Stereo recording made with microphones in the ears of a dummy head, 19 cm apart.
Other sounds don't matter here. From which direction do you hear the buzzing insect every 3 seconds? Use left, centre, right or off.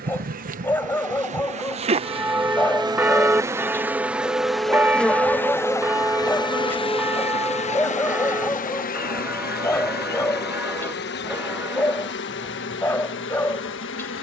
right, centre, left, left, left.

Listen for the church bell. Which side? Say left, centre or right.
centre.